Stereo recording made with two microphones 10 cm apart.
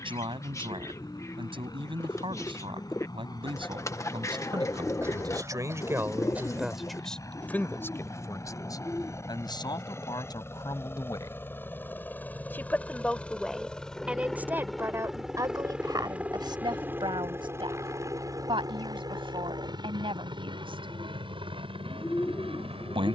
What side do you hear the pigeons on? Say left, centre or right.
left.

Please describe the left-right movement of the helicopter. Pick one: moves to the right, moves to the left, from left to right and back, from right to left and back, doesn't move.
moves to the right.